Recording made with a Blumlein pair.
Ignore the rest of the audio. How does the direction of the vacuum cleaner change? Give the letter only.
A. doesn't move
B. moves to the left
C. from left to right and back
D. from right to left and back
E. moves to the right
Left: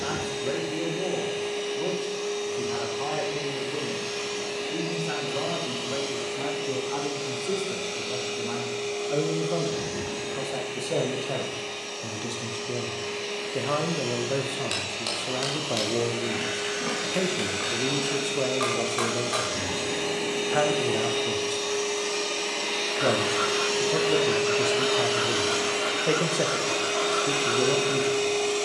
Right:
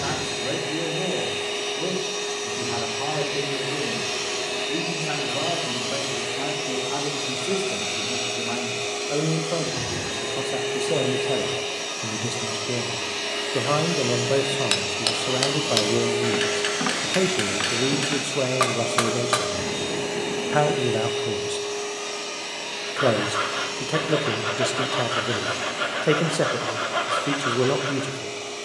B.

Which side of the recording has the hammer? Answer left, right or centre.
right.